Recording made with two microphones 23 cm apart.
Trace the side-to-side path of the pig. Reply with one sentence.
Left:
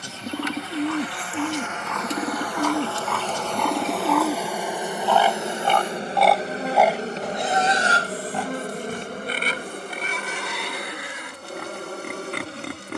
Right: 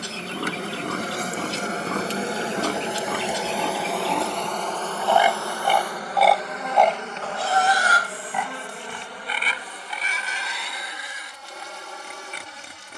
In this clip you hear the pig go from the right side to the left.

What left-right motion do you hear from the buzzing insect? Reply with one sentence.
In this clip you hear the buzzing insect move to the left.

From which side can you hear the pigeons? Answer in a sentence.
You can hear the pigeons on the left.